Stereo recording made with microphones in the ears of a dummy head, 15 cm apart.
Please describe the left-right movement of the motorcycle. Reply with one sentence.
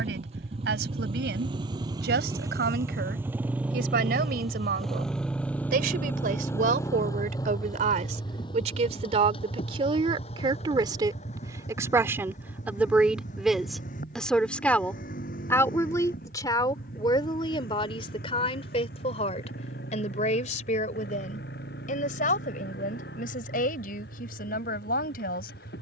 In this clip you hear the motorcycle go from the right side to the left.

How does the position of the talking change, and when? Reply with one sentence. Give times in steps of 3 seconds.
You can hear the talking on the right from 0 s, in the centre from 12 s and on the left from 15 s.